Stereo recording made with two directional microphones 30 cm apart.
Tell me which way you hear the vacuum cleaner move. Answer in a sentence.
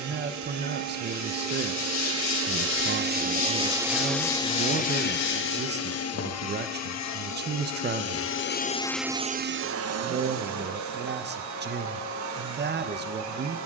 You can hear the vacuum cleaner go left and come back.